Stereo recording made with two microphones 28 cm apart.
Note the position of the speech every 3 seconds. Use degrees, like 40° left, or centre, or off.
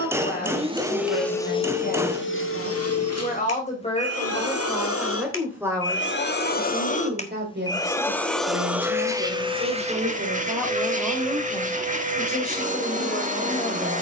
30° left, 10° left, 40° right, 10° right, 20° left.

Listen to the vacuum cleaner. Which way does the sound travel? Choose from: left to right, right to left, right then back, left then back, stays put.
left then back.